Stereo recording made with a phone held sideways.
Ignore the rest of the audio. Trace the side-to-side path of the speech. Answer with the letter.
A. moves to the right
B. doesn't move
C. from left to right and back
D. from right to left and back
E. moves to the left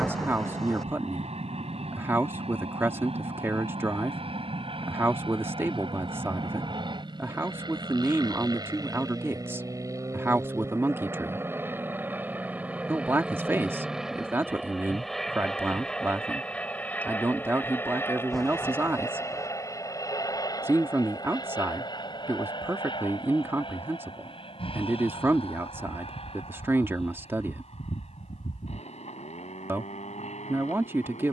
B.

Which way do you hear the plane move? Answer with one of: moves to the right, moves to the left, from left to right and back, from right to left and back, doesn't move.
moves to the left.